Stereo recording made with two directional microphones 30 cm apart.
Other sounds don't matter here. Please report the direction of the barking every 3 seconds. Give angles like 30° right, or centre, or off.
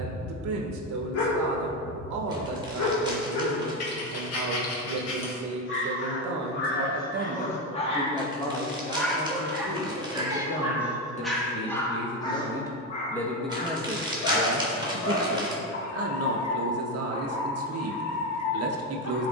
60° left, 50° left, 30° left, centre, 30° left, 50° left, 60° left.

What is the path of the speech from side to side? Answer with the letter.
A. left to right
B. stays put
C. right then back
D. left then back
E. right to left
D.